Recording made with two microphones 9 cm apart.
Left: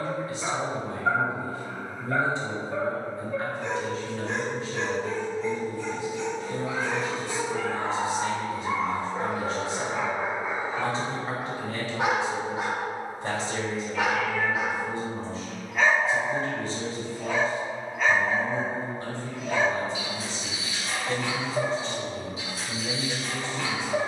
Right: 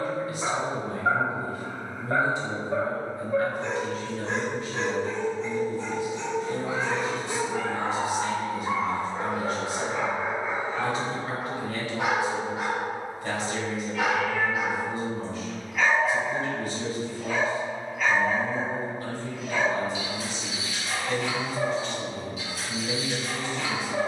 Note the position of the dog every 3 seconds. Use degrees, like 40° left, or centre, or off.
30° right, 30° right, 20° right, 10° left, 30° left, 30° left, 30° left, 30° left.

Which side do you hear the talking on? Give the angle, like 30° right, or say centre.
30° left.